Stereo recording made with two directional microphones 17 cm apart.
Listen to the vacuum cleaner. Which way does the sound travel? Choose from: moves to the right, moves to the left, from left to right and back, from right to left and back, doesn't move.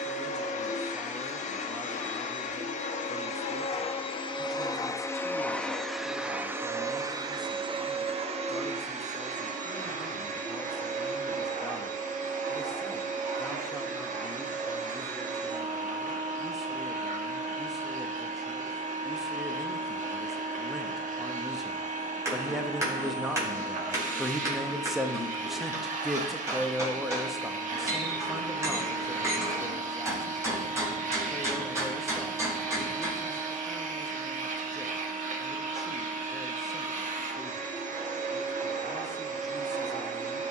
moves to the right.